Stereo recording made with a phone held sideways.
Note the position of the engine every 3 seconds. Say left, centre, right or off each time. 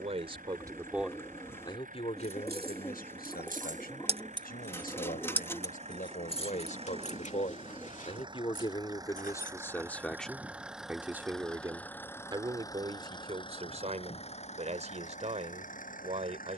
right, right, right, centre, left, left.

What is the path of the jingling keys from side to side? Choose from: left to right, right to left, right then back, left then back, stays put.
right to left.